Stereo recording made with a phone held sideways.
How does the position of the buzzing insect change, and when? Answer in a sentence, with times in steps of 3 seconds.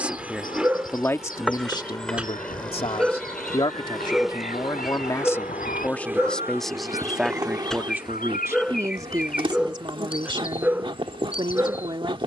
You can hear the buzzing insect in the centre from 0 s and on the right from 6 s.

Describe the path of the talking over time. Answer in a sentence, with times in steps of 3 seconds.
You can hear the talking on the left from 0 s, in the centre from 6 s and on the right from 9 s.